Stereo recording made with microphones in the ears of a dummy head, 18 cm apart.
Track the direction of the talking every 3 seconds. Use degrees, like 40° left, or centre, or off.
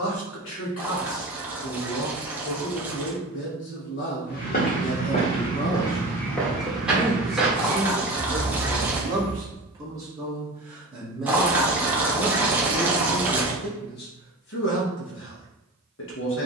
70° left, 50° left, centre, 10° right, 40° left, 70° left.